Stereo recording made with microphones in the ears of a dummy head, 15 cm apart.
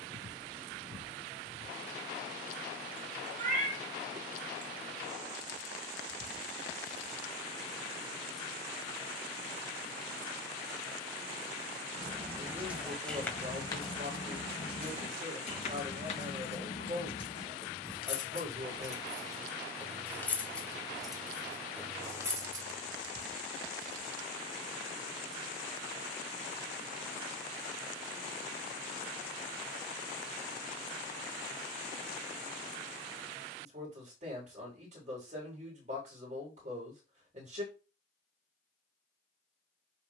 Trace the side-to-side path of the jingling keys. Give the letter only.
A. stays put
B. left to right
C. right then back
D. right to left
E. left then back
E.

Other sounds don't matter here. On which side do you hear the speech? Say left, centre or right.
right.